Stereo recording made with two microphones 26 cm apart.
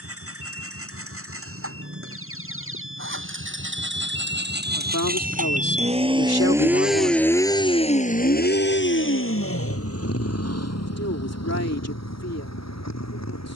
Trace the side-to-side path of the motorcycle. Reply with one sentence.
In this clip you hear the motorcycle travel towards the left.